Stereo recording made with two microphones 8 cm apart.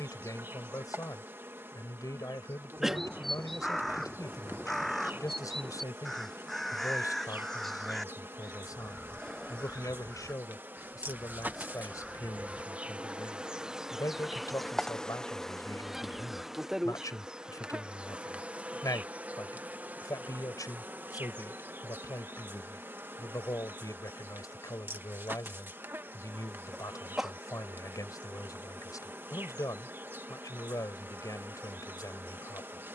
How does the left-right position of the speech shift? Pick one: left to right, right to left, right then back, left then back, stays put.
stays put.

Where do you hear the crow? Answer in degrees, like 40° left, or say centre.
centre.